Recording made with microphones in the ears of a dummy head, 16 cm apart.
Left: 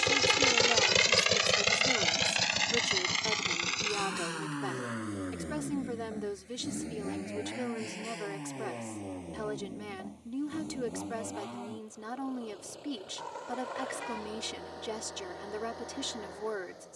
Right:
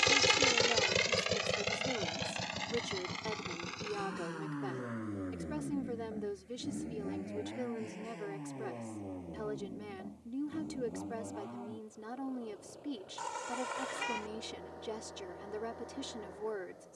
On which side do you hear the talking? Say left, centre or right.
left.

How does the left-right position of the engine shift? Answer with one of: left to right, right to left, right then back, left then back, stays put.
right to left.